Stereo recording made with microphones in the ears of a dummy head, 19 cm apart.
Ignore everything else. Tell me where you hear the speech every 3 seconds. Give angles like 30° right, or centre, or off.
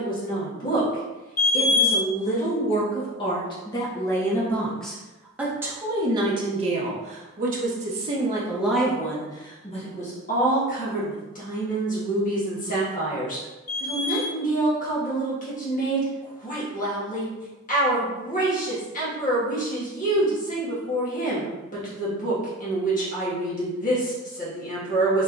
40° left, 10° left, 20° right, 30° left, 40° left, 40° left, 40° left, 40° left, 40° left.